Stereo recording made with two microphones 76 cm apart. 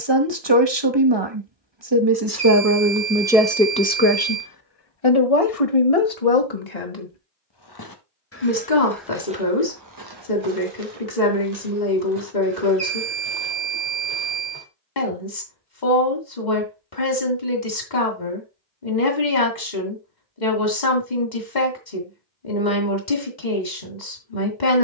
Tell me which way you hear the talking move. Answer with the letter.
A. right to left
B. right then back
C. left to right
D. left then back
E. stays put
A.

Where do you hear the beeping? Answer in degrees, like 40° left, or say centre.
60° right.